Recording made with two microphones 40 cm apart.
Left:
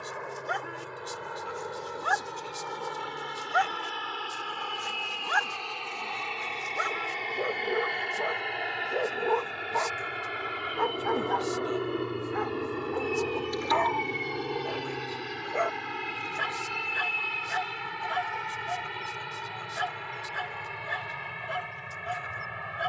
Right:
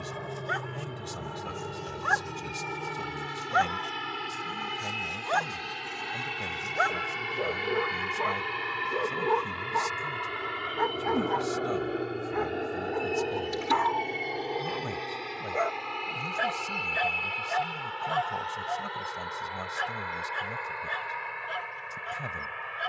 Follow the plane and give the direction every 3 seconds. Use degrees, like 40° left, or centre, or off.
50° right, 40° right, 20° right, centre, 10° left, 30° left, 40° left, 50° left.